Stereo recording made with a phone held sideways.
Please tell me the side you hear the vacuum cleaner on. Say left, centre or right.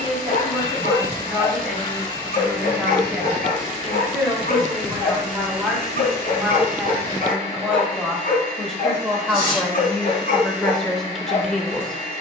left.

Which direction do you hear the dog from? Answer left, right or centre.
left.